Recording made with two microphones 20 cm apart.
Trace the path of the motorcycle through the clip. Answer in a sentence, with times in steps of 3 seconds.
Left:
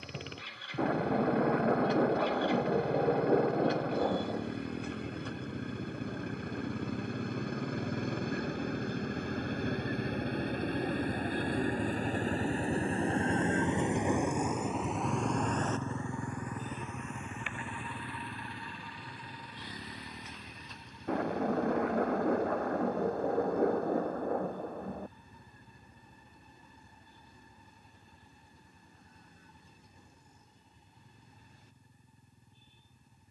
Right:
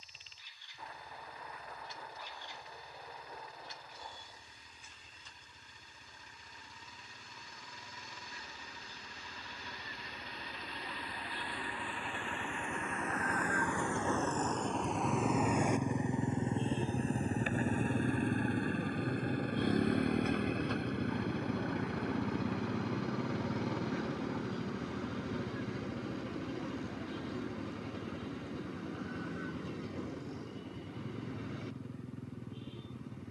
In this clip you hear the motorcycle on the left from 0 s and on the right from 15 s.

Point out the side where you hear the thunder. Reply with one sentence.
You can hear the thunder on the left.